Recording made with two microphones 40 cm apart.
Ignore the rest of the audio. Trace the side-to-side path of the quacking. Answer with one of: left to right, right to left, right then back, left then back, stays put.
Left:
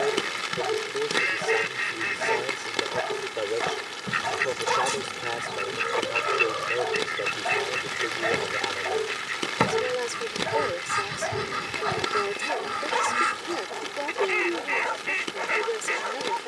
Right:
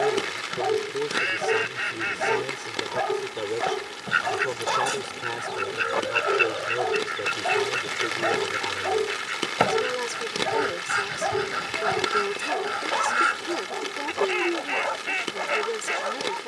stays put.